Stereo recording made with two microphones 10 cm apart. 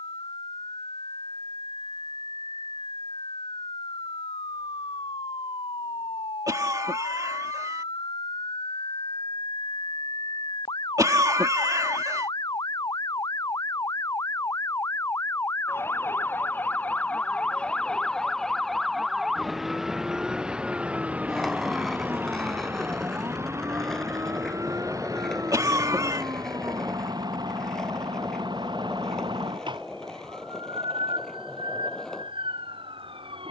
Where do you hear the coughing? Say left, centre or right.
right.